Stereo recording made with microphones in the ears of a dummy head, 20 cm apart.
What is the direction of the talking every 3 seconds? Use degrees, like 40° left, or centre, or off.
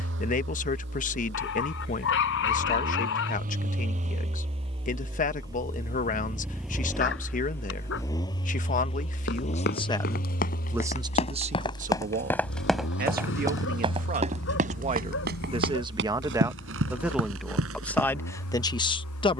40° left, 40° left, 40° left, centre, 40° right, 10° right, 20° left.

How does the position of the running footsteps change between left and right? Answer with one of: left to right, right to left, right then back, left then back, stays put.
left to right.